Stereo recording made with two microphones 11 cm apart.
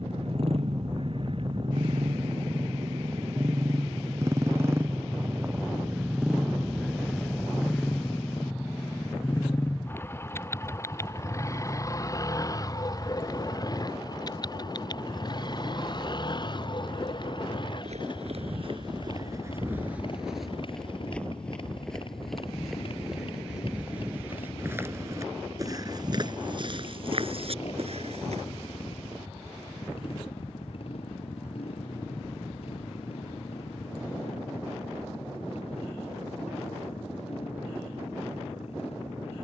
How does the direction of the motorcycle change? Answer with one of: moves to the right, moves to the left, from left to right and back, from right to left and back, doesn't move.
moves to the left.